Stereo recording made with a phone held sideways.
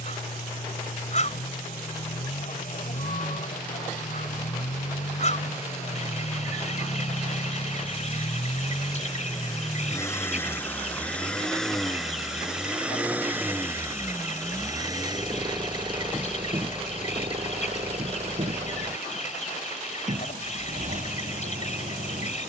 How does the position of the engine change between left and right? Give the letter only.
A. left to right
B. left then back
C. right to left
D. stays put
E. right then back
A.